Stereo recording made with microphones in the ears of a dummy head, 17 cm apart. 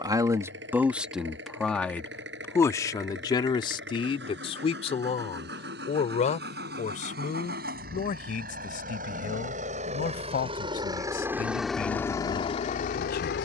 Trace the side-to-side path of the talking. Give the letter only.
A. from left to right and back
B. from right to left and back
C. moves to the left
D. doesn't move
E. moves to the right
C.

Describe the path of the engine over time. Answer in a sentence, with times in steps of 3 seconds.
In this clip you hear the engine on the right from 0 s and on the left from 12 s.